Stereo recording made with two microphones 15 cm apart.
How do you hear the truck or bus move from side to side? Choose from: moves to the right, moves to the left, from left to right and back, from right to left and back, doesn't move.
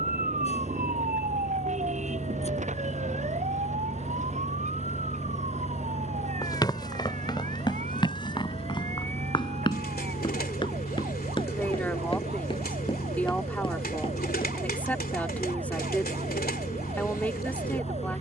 doesn't move.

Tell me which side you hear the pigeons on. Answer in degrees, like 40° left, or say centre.
90° left.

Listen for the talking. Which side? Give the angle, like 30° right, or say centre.
10° left.